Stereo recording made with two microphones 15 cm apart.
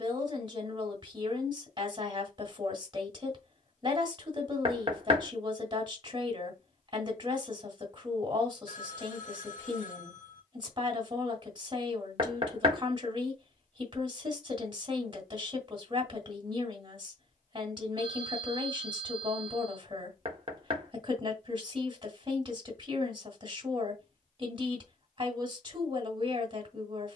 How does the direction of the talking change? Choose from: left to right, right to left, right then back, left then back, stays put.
stays put.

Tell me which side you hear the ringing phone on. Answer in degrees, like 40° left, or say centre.
60° left.